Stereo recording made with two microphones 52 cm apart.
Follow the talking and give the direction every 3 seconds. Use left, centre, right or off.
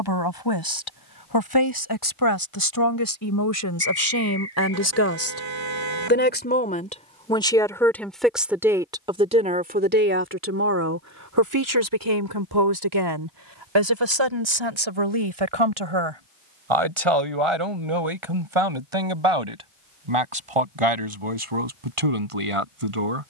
left, left, centre, right, right, right, right, right.